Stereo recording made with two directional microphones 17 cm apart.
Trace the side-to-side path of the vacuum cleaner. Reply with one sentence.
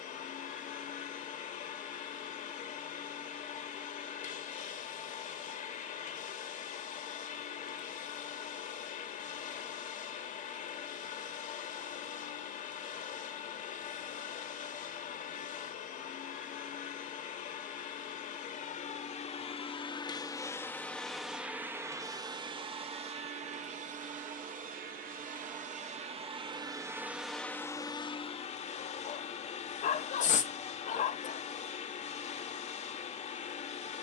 In this clip you hear the vacuum cleaner go right and come back.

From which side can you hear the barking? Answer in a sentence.
In this clip you hear the barking on the left.